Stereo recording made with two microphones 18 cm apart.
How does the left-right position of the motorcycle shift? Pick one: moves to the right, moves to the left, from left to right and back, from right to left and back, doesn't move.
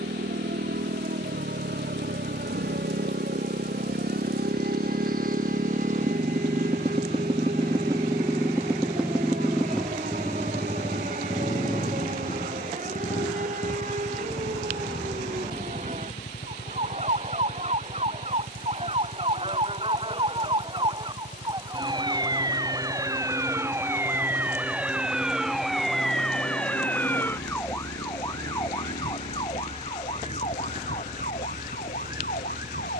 moves to the left.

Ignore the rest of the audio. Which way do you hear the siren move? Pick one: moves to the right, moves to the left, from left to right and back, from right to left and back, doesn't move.
moves to the left.